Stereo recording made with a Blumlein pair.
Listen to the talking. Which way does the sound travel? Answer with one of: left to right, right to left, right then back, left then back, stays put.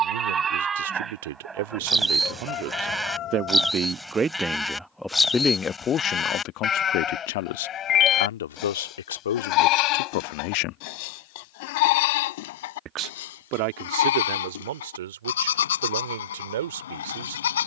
left then back.